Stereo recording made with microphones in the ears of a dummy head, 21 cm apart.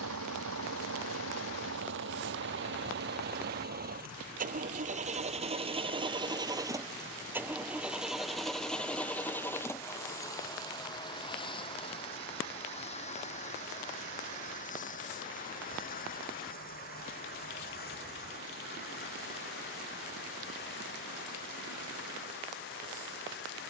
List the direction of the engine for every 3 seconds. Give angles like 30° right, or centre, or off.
60° right, 40° right, 10° right, 20° left, 30° left, 40° left, 50° left, 50° left.